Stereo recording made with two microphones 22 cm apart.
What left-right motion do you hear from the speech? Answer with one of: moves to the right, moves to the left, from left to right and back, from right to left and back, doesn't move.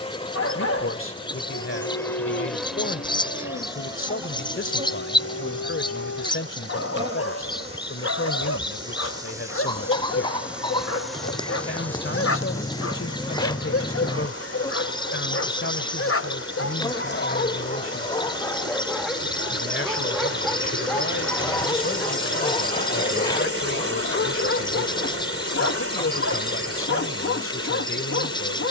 doesn't move.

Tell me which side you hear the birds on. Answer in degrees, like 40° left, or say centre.
20° left.